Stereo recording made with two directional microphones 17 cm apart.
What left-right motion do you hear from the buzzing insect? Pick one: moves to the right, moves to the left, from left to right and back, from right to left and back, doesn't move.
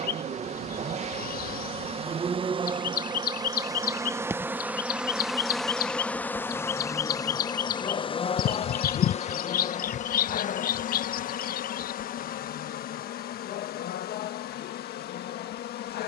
moves to the left.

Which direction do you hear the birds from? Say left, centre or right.
left.